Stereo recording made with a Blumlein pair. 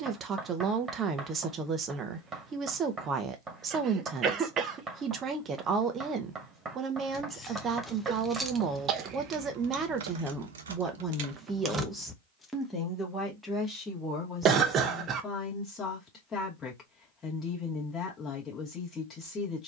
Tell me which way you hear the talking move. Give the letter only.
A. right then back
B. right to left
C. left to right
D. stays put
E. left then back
B.